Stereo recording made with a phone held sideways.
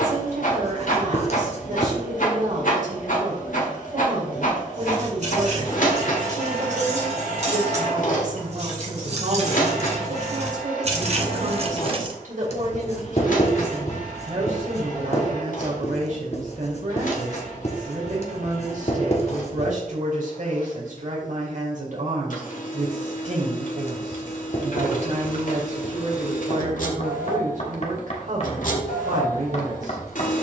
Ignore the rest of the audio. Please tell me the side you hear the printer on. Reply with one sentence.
You can hear the printer on the left.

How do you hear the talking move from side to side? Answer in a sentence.
In this clip you hear the talking stay in one place.